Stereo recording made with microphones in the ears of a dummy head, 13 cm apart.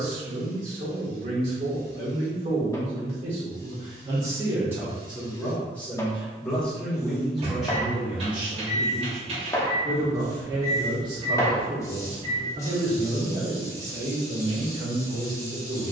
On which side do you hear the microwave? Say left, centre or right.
right.